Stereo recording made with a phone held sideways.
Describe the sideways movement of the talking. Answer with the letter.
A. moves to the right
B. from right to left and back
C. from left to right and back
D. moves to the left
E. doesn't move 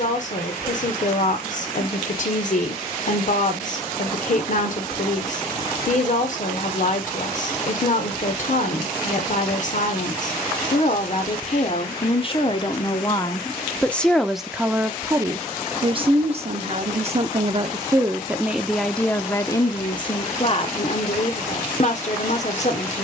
C.